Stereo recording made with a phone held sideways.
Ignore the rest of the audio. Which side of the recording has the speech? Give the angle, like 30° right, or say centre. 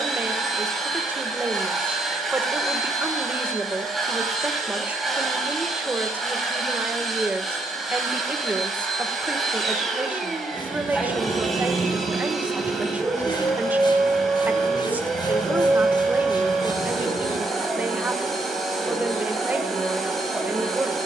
10° right.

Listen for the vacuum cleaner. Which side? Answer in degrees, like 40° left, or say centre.
centre.